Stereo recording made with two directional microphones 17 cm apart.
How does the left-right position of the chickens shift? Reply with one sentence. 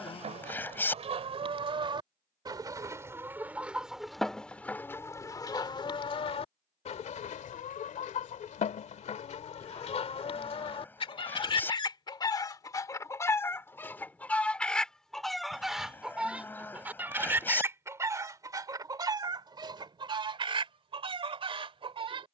You can hear the chickens move from right to left and back again.